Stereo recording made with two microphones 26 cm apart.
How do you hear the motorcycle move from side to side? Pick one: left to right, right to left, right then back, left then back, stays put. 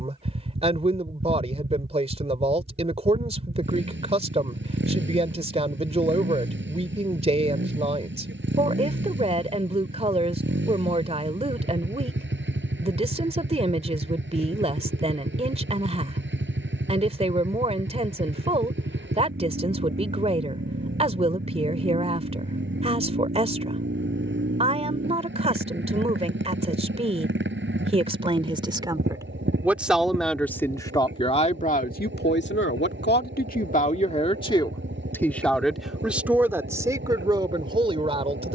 stays put.